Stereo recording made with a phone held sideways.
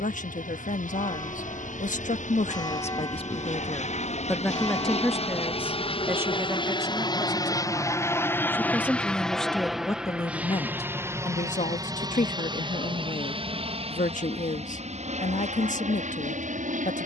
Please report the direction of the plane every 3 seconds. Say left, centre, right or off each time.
left, left, left, centre, right, right.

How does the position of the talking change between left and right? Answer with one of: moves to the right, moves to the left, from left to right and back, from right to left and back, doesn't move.
from left to right and back.